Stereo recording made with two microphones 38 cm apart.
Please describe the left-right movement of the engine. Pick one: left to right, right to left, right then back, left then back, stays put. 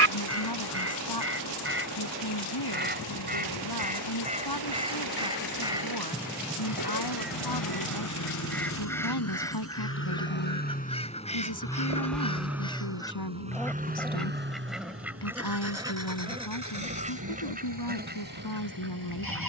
left to right.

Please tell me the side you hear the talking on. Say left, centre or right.
left.